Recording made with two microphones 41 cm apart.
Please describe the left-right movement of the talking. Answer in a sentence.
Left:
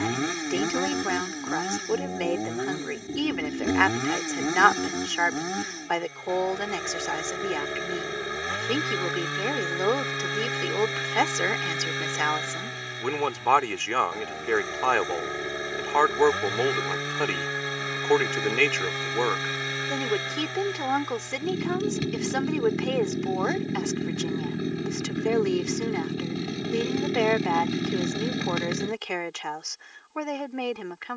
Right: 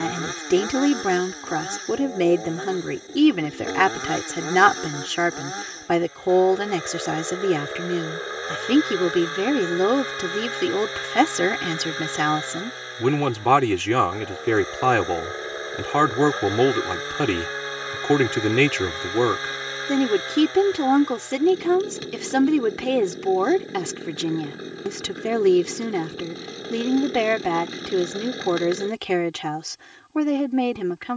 You can hear the talking stay in one place.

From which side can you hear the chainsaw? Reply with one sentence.
You can hear the chainsaw on the left.